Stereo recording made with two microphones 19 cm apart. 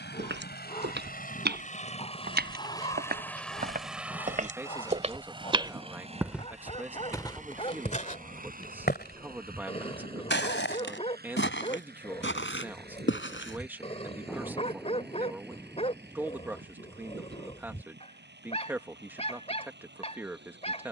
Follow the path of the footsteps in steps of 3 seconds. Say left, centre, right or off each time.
right, right, left, left, left, off, off.